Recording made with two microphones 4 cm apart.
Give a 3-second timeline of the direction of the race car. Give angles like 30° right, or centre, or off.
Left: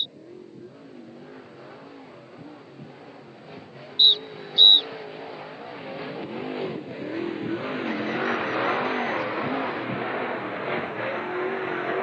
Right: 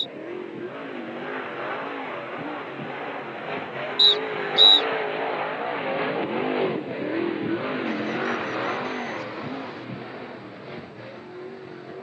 70° right, 60° right, 20° right, 40° left.